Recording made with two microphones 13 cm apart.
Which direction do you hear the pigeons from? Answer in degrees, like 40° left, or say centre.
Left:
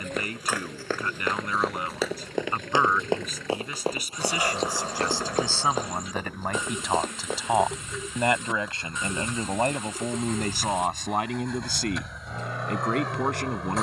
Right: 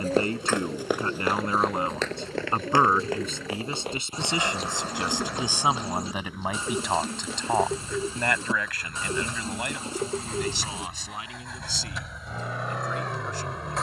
30° right.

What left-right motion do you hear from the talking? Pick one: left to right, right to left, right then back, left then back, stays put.
right to left.